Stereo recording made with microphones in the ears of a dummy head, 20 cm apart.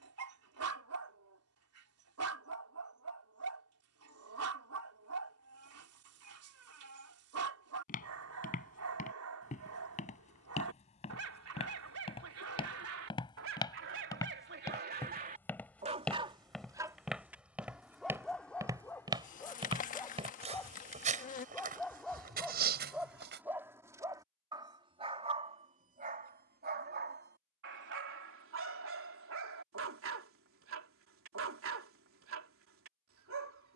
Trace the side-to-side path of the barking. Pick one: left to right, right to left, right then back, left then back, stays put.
left then back.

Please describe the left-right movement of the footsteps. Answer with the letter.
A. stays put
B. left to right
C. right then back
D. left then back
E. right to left
B.